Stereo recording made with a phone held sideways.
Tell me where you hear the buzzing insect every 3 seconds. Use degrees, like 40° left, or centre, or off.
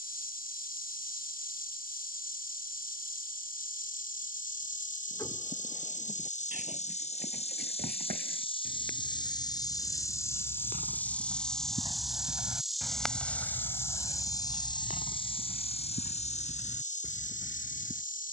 70° left, 60° left, 40° left, 20° left, 10° left, 50° left.